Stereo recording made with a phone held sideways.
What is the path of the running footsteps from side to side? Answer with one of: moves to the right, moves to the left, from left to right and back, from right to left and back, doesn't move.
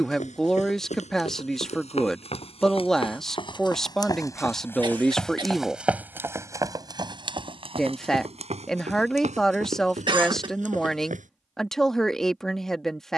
moves to the right.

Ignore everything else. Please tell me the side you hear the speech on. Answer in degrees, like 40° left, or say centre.
centre.